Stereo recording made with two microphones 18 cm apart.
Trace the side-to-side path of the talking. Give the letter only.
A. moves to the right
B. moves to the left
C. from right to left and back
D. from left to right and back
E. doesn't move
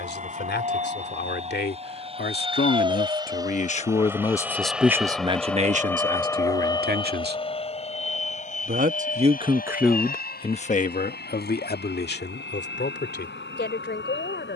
D.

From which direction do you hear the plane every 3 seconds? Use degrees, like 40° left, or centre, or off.
40° right, 10° right, 30° left, 50° left, 60° left.